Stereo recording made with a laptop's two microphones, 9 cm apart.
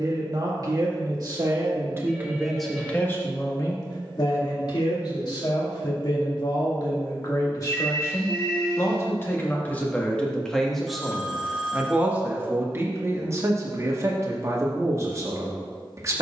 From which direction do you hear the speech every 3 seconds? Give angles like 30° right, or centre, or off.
30° right, 50° left, 40° left, 10° left, 30° right, 30° right.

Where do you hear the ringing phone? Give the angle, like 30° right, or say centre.
10° right.